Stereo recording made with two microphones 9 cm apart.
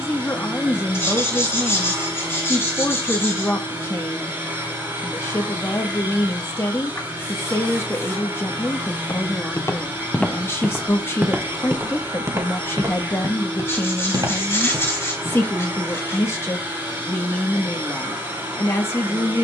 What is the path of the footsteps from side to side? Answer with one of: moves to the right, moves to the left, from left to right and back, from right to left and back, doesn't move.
moves to the right.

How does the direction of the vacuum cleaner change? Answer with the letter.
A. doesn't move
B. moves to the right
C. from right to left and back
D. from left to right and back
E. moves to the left
A.